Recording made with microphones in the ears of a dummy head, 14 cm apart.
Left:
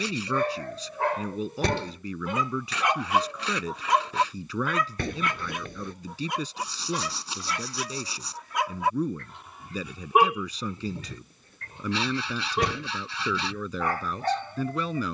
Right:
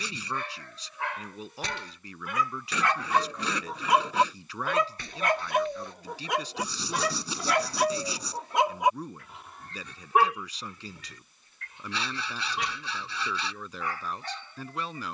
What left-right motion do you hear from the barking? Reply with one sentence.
In this clip you hear the barking move from left to right and back again.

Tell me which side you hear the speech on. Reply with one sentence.
You can hear the speech on the left.